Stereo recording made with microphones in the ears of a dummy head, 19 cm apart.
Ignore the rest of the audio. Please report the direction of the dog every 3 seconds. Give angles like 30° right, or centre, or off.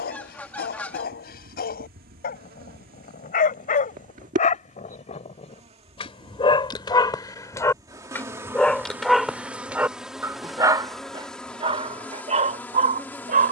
50° left, 40° left, 20° left, 10° right, 40° right.